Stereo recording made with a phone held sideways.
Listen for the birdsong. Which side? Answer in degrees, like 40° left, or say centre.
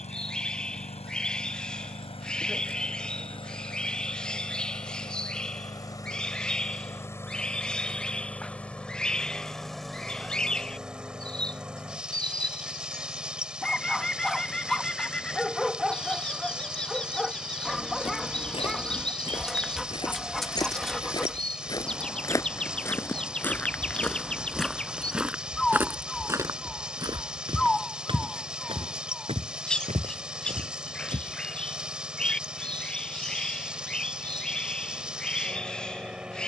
10° left.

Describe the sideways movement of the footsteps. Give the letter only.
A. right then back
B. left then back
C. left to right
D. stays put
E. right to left
C.